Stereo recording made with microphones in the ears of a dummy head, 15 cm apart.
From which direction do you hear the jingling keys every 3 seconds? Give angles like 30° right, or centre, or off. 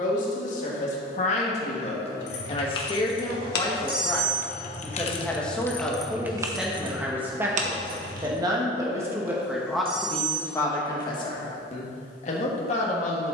70° left, 40° left, 30° right, off, off.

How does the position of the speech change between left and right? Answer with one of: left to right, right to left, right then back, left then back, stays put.
right then back.